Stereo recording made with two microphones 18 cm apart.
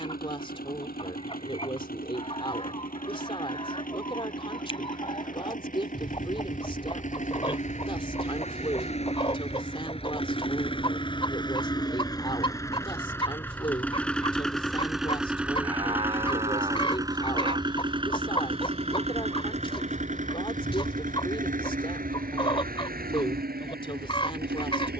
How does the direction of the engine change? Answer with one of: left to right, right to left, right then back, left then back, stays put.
left to right.